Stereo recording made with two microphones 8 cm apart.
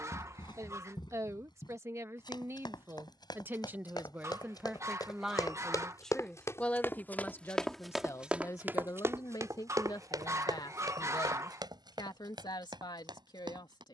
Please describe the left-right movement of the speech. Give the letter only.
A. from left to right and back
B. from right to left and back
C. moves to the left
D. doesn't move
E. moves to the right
C.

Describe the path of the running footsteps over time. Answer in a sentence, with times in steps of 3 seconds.
In this clip you hear the running footsteps on the left from 0 s, in the centre from 6 s and on the right from 9 s.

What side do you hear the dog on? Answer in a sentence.
In this clip you hear the dog on the right.